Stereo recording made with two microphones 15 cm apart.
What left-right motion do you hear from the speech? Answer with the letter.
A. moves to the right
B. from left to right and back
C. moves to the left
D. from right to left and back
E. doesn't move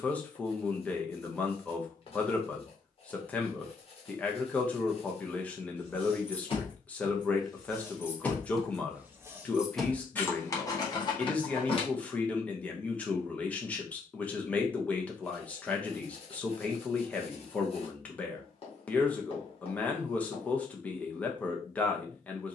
E.